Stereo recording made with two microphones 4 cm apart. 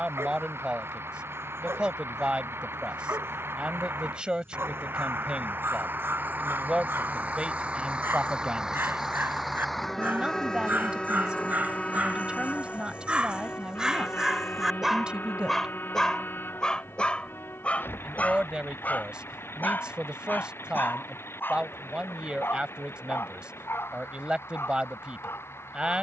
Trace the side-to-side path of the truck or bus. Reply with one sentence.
You can hear the truck or bus move from right to left.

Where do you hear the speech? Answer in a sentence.
In this clip you hear the speech on the right.